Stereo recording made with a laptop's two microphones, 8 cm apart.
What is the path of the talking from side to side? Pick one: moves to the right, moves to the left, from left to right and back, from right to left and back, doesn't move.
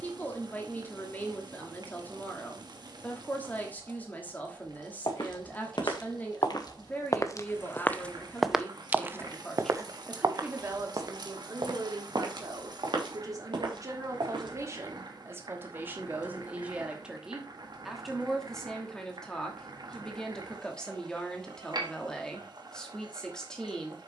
from left to right and back.